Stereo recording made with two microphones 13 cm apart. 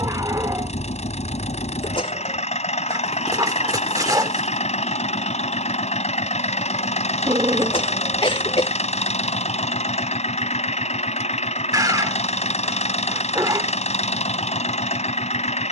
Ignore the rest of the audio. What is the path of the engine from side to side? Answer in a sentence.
In this clip you hear the engine stay put.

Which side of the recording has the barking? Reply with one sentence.
In this clip you hear the barking on the right.